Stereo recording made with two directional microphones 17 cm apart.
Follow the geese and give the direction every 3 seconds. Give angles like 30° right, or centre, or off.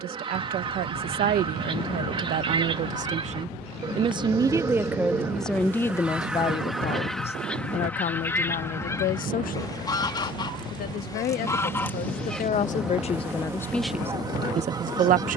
30° right, 20° right, 10° left, 20° left, 10° right.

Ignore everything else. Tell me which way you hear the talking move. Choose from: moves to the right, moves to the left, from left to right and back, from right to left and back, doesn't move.
from right to left and back.